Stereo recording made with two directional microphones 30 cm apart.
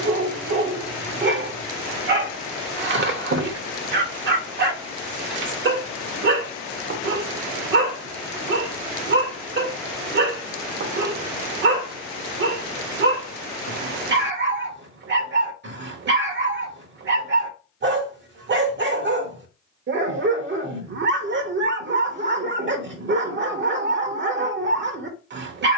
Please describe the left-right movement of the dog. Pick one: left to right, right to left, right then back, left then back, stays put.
stays put.